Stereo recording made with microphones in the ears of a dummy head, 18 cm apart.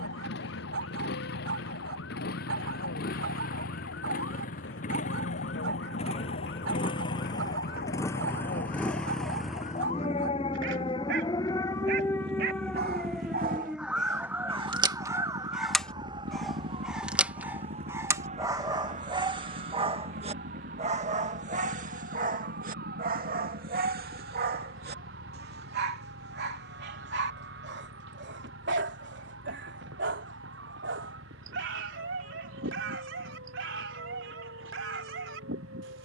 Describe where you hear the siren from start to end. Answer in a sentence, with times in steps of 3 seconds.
You can hear the siren on the left from 0 s, in the centre from 12 s and on the right from 15 s.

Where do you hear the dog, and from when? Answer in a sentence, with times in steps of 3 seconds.
You can hear the dog on the right from 0 s, in the centre from 15 s and on the right from 18 s.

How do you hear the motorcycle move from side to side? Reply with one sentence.
You can hear the motorcycle go from the left side to the right.